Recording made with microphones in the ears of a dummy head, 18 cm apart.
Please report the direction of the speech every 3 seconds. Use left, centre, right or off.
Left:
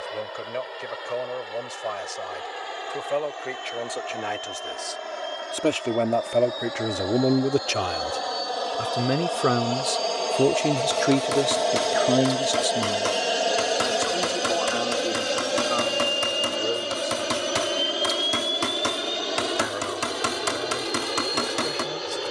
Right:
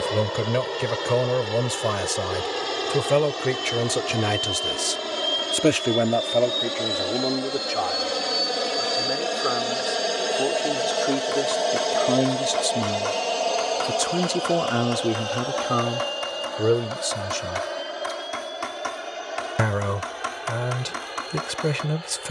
right, right, left, left, right, right, right, right.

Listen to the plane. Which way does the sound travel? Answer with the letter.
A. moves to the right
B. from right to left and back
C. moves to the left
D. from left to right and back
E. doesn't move
C.